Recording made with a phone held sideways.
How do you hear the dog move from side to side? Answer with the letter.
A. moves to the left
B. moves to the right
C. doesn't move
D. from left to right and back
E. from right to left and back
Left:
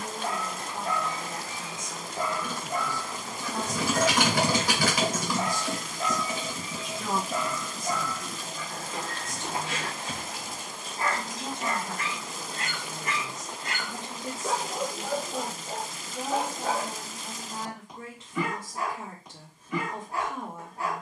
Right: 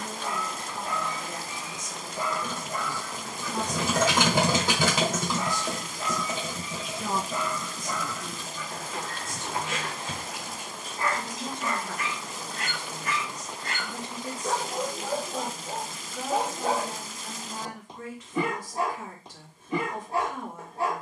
B.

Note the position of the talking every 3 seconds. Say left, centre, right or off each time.
left, centre, centre, left, left, left, left.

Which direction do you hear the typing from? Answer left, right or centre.
right.